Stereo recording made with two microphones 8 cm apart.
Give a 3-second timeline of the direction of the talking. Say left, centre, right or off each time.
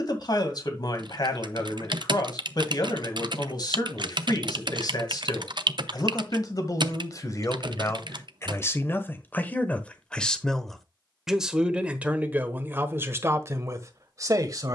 left, left, left, centre, right.